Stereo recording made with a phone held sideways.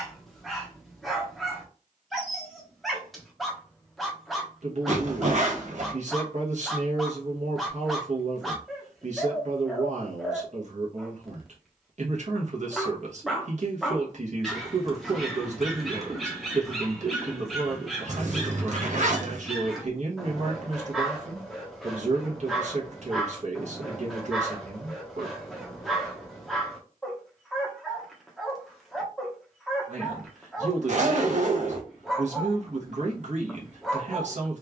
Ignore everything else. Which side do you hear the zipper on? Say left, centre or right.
right.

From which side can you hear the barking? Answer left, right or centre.
centre.